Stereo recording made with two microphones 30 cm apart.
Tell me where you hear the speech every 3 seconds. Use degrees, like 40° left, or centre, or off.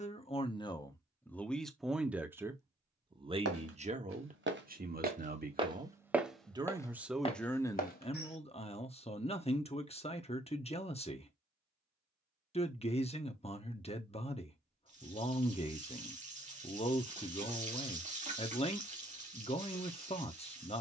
10° left, 30° right, 10° left, 20° left, 20° left, 20° left, 20° left.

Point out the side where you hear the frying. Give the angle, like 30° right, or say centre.
20° right.